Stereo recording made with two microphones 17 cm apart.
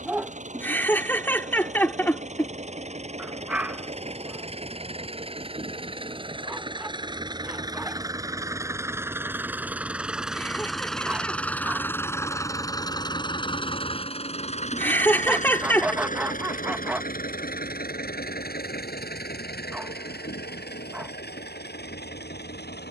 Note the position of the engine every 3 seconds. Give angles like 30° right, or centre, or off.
50° right, 40° right, 20° right, centre, 30° left, 60° left, 70° left, 80° left.